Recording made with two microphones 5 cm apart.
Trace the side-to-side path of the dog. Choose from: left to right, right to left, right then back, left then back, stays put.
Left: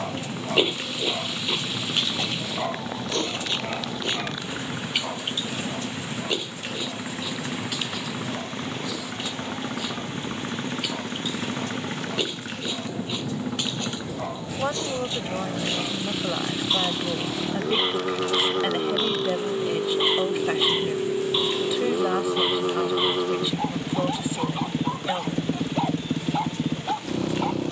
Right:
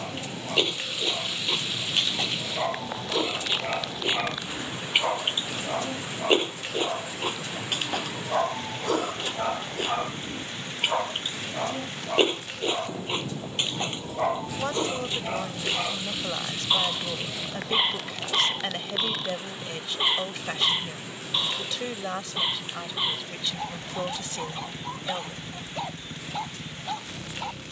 right then back.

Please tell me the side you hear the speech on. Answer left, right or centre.
centre.